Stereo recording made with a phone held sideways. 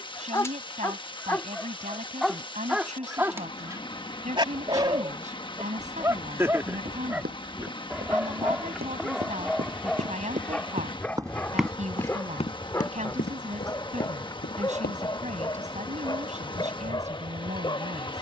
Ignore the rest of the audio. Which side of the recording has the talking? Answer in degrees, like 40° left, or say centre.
50° right.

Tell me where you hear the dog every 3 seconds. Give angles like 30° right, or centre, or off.
10° left, 20° right, 10° right, 10° left, 20° left, 30° left.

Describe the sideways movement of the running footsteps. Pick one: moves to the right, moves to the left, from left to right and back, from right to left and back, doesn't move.
moves to the left.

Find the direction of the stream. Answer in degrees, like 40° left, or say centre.
30° left.